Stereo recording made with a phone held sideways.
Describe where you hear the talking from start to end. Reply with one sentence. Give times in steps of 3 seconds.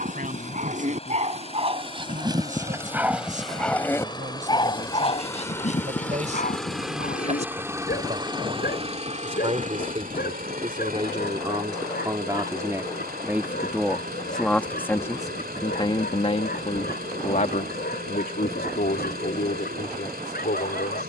In this clip you hear the talking on the right from 0 s, in the centre from 12 s and on the left from 15 s.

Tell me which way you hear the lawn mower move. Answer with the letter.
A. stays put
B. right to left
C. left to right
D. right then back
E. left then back
C.